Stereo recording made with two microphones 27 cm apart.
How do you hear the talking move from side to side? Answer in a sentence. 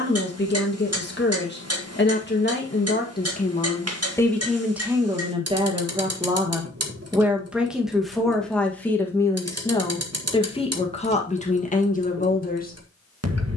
In this clip you hear the talking go right and come back.